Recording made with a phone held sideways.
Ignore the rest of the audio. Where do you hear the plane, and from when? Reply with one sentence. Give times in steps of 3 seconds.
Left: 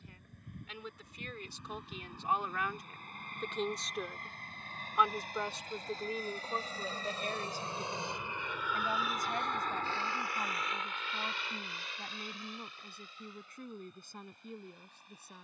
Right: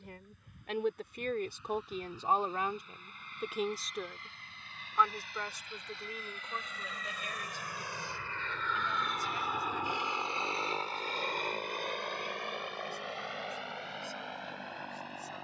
In this clip you hear the plane on the left from 0 s and on the right from 9 s.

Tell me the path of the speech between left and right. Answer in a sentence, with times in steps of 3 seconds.
You can hear the speech on the right from 0 s, in the centre from 3 s and on the left from 6 s.